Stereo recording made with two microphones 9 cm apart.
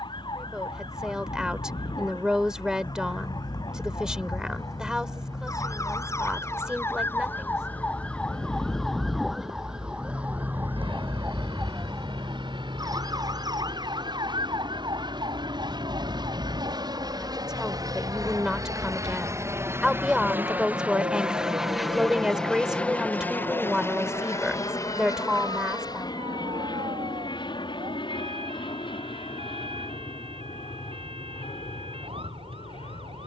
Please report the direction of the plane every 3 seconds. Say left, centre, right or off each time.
right, right, right, right, right, right, right, centre, left, left, left.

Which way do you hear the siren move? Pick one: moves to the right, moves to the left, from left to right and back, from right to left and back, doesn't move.
moves to the right.